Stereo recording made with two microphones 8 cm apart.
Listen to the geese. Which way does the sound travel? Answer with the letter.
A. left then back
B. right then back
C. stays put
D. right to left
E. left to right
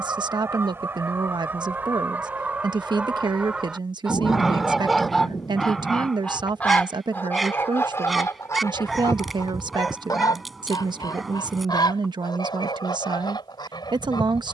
D.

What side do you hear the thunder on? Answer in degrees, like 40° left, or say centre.
50° left.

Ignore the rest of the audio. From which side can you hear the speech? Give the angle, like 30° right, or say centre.
70° right.